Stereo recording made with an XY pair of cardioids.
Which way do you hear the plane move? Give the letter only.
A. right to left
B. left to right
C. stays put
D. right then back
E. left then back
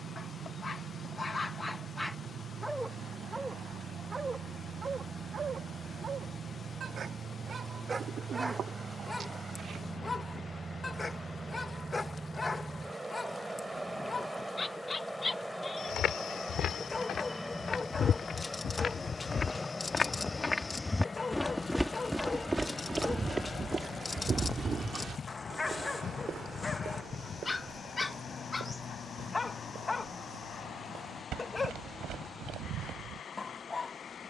A.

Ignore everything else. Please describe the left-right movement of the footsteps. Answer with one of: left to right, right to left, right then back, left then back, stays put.
left to right.